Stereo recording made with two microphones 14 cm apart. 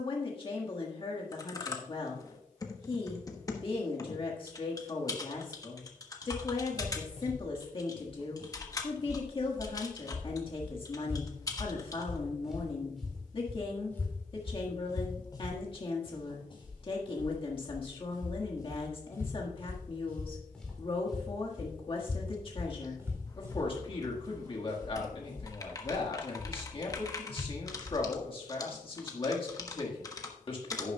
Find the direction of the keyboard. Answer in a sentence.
You can hear the keyboard on the left.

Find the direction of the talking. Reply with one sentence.
You can hear the talking on the left.